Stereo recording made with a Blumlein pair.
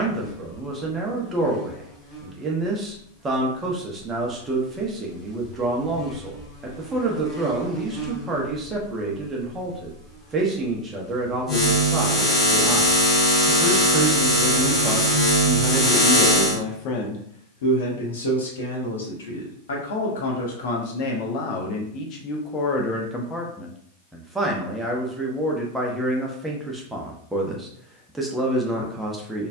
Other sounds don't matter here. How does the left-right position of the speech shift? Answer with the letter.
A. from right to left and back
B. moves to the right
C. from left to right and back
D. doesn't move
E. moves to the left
A.